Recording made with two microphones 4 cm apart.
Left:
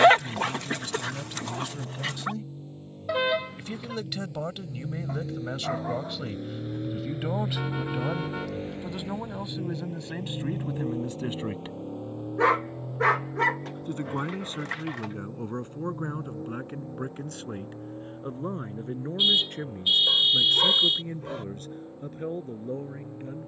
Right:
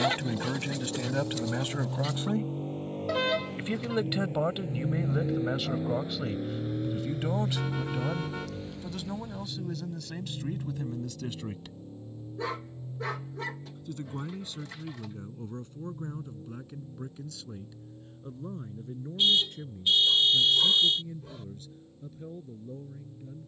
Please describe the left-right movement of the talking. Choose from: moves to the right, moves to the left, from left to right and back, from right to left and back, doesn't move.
moves to the left.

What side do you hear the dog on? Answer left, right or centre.
left.